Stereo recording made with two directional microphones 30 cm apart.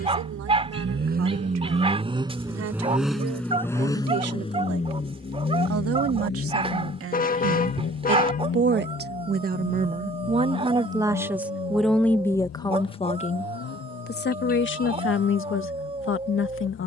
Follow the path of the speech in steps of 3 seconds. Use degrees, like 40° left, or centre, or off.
70° right, 60° right, 50° right, 20° right, 30° left, 50° left.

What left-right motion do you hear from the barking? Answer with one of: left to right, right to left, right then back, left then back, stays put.
stays put.